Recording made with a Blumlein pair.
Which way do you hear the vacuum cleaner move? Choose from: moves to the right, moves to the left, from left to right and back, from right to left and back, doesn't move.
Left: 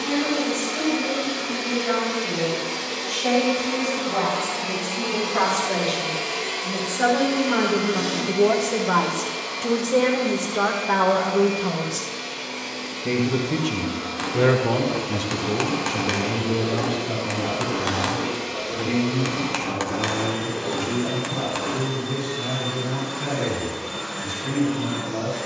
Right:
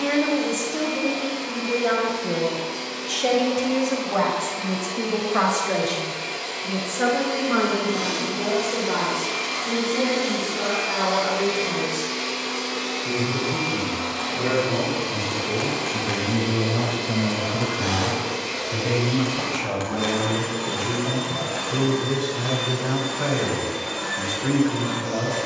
moves to the right.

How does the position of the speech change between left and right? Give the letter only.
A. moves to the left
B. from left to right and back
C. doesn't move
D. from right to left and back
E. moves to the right
D.